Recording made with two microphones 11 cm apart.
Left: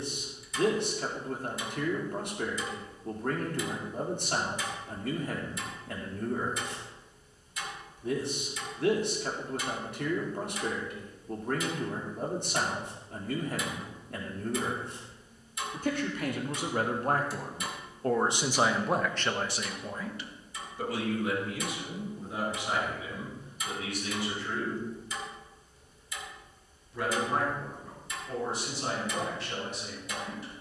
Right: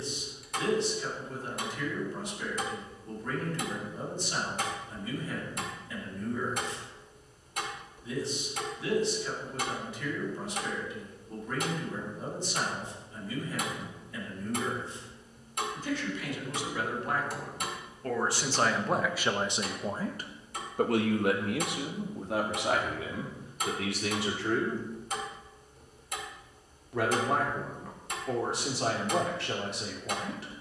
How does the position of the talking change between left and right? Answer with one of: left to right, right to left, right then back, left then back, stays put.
left to right.